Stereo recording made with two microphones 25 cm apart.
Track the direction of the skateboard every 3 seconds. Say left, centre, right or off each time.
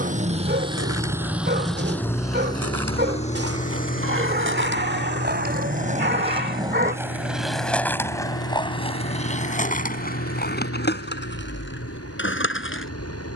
right, right, centre, left, left.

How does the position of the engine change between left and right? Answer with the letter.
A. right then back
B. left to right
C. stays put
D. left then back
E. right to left
E.